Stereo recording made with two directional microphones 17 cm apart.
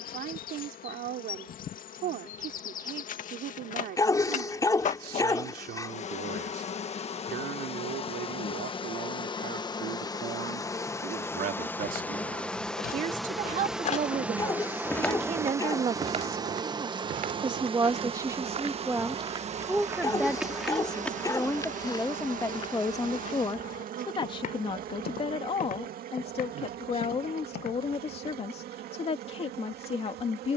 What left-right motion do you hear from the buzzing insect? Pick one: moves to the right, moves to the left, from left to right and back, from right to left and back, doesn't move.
moves to the right.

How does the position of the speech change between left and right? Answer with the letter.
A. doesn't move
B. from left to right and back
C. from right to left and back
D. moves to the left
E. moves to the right
D.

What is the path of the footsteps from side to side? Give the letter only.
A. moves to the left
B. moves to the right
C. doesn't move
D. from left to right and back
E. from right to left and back
D.